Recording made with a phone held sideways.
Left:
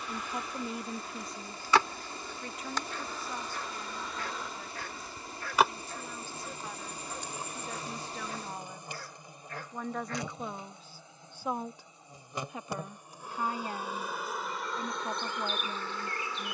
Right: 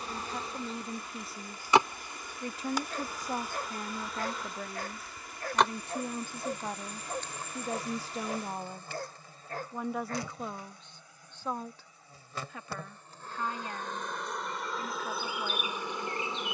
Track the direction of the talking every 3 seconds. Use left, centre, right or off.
centre, right, right, centre, left, left.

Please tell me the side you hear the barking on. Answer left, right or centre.
right.